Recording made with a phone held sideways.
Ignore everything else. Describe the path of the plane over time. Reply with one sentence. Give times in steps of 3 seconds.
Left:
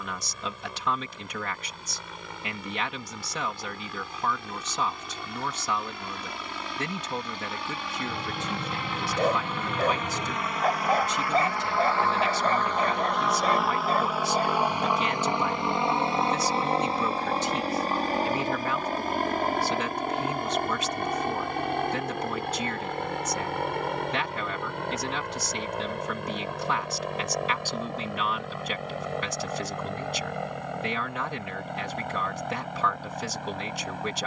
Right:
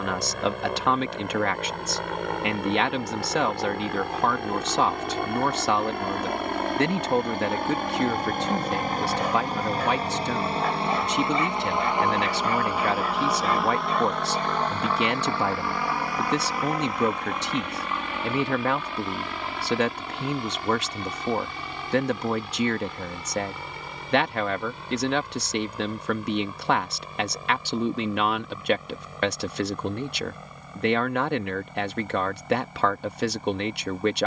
In this clip you hear the plane on the right from 0 s, in the centre from 12 s and on the left from 15 s.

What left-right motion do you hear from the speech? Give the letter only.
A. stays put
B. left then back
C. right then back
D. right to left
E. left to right
A.